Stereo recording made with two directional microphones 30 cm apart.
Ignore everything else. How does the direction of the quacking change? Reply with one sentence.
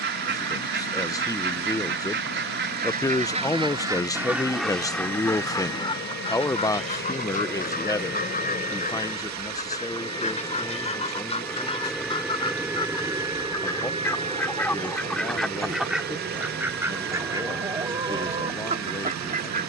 You can hear the quacking move from right to left and back again.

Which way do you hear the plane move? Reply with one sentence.
You can hear the plane go from the left side to the right.